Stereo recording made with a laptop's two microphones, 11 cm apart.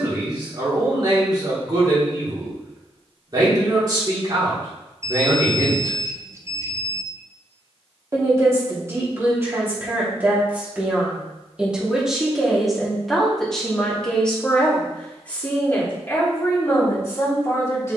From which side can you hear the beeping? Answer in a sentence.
You can hear the beeping on the right.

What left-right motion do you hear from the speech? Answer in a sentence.
In this clip you hear the speech travel towards the left.